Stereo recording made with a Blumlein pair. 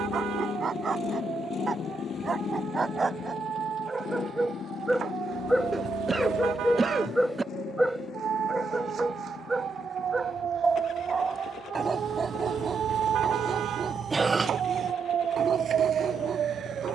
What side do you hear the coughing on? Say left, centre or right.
centre.